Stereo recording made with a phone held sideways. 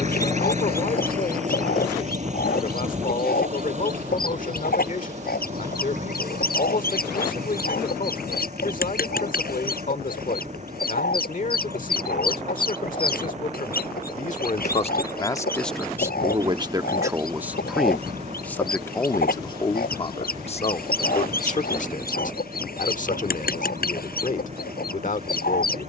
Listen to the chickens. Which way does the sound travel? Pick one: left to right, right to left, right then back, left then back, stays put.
stays put.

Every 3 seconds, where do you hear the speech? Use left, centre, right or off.
left, left, left, left, left, centre, left, left, left.